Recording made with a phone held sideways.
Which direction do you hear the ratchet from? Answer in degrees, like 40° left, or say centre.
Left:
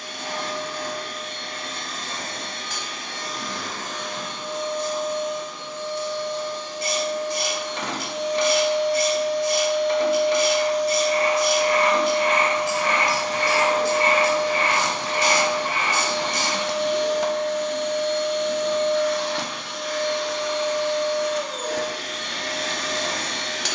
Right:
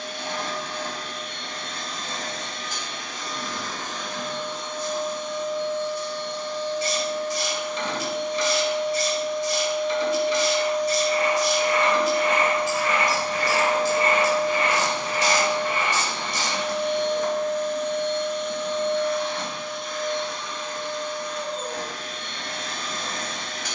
50° left.